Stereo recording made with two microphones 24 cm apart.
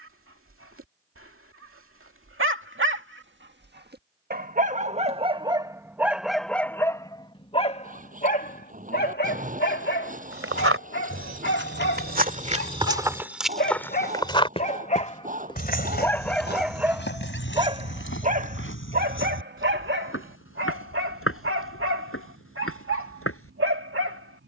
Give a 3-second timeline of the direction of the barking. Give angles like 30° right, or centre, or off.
60° right, 30° right, 20° left, 50° left, 40° left, centre, 50° right, 60° right.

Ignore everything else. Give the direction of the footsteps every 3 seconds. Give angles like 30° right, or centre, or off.
off, off, off, 60° right, 10° right, 50° left, 60° left, 60° left.